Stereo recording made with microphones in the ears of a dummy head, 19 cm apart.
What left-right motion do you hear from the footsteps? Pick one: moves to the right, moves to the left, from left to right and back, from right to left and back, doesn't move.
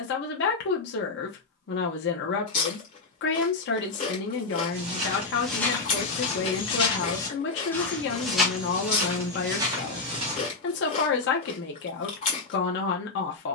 from right to left and back.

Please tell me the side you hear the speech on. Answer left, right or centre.
left.